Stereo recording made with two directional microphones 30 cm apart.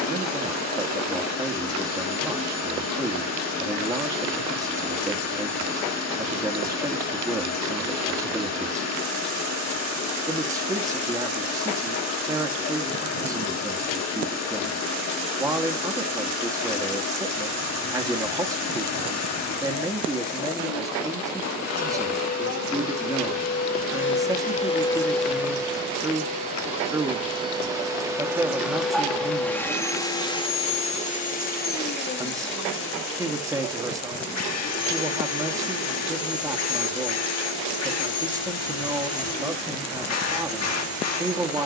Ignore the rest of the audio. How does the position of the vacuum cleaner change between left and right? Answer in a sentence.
You can hear the vacuum cleaner move from left to right and back again.